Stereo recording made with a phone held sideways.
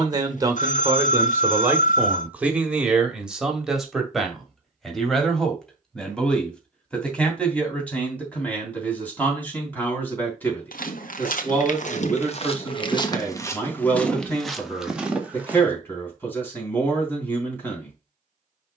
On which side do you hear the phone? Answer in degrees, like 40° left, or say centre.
60° left.